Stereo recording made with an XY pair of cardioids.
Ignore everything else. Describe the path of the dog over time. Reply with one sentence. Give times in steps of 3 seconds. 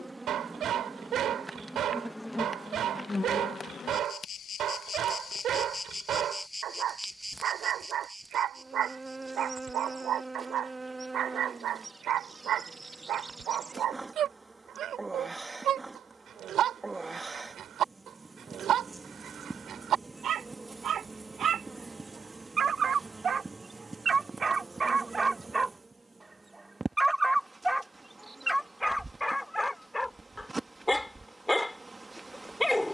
In this clip you hear the dog on the right from 0 s and in the centre from 27 s.